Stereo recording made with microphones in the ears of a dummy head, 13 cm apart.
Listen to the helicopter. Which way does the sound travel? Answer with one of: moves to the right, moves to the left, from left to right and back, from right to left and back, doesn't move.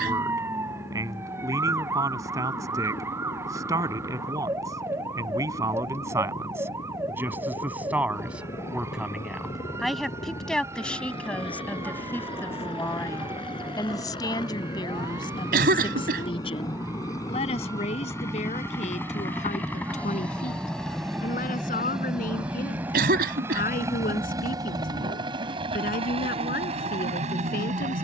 moves to the right.